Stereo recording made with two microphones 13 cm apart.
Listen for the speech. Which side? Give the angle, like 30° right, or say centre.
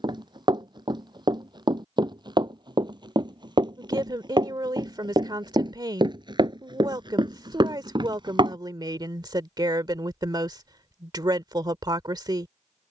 30° right.